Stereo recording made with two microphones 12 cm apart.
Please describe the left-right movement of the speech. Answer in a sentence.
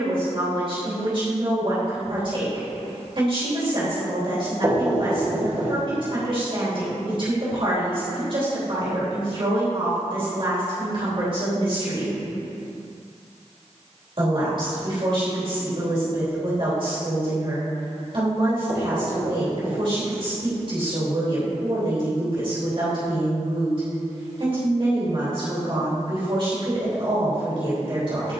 You can hear the speech stay in one place.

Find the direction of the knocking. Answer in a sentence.
In this clip you hear the knocking on the right.